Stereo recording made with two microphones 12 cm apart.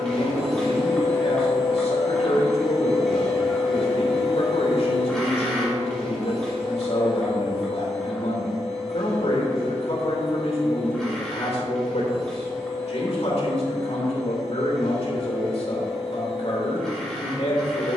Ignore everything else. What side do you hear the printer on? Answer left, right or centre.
centre.